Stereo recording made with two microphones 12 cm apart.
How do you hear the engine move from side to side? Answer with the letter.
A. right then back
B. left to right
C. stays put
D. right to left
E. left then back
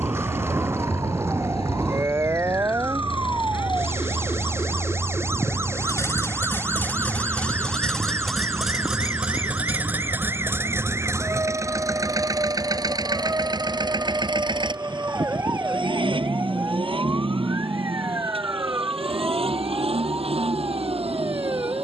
B.